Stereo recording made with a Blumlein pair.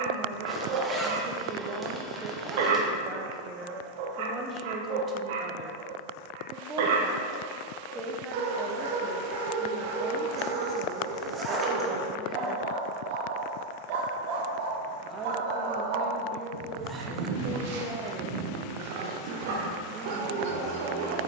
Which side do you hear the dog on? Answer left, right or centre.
right.